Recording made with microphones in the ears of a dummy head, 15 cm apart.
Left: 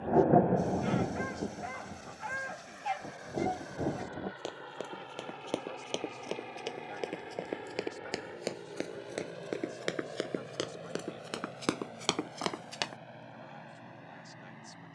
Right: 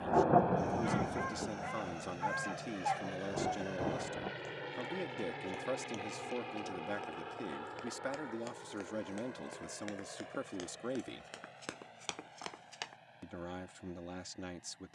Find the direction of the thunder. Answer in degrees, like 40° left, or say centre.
30° left.